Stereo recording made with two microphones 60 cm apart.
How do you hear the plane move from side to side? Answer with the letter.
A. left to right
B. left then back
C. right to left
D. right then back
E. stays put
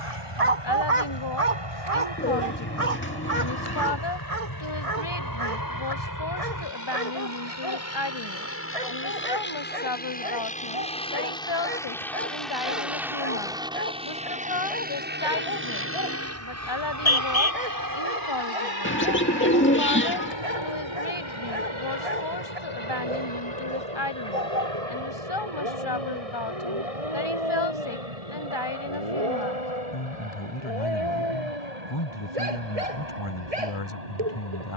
A.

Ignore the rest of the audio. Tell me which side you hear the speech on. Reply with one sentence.
In this clip you hear the speech on the left.